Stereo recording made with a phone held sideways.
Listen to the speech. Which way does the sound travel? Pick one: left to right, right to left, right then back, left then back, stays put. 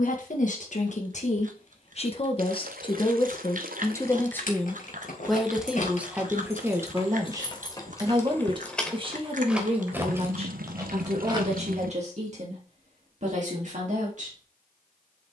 left to right.